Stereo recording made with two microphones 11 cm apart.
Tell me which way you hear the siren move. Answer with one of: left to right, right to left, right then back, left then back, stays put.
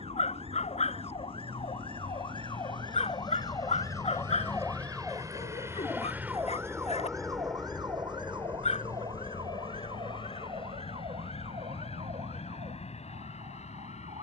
left to right.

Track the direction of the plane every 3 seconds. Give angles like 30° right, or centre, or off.
60° right, 40° right, 10° left, 40° left, 60° left.